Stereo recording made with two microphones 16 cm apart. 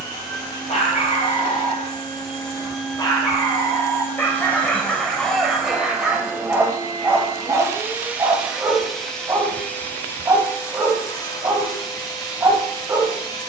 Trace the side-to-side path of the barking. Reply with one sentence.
You can hear the barking travel towards the right.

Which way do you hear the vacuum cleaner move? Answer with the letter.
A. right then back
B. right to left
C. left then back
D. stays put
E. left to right
A.